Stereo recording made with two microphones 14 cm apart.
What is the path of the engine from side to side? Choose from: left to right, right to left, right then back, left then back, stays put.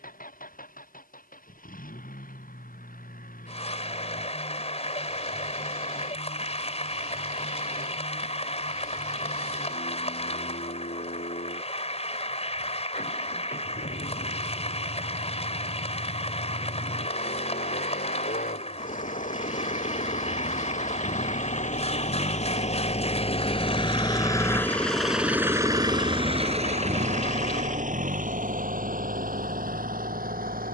left to right.